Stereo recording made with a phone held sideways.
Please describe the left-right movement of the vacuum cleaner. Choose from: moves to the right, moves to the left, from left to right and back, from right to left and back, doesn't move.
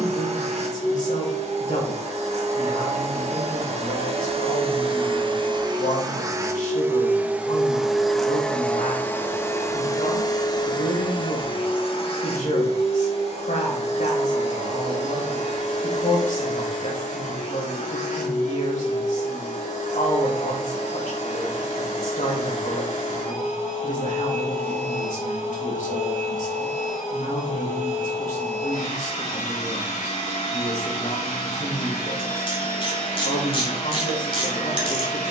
moves to the left.